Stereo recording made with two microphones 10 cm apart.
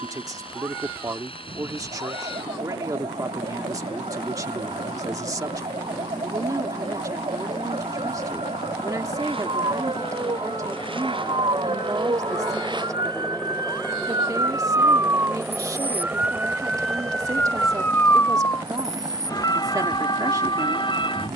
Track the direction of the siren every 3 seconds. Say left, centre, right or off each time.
right, right, right, right, right, centre, left.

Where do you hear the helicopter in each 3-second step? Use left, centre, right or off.
left, left, left, left, centre, right, right.